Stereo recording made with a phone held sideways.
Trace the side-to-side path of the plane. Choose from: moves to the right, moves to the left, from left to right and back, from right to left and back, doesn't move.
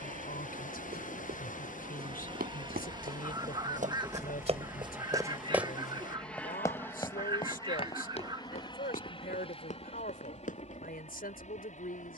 moves to the left.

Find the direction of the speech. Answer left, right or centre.
left.